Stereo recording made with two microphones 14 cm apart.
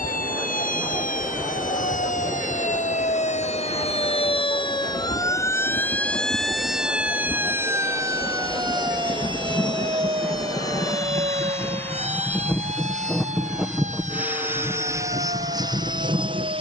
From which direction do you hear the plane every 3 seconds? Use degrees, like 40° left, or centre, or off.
60° left, 50° left, 40° left, 30° left, centre, 30° right.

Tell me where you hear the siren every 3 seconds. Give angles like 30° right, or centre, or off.
70° left, 30° left, 10° right, 40° right, 50° right, 60° right.